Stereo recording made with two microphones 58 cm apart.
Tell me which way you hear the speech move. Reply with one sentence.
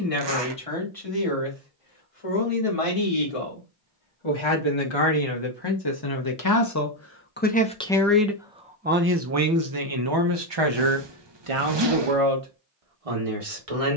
In this clip you hear the speech go from the left side to the right.